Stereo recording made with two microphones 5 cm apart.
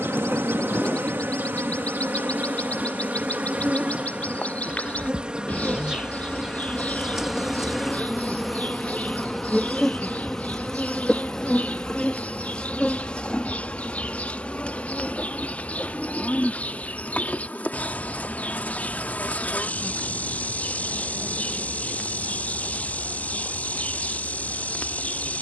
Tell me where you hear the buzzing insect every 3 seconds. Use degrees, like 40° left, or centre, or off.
40° right, 30° right, 10° right, 10° left, 20° left, 30° left, 30° left, 30° left, 30° left.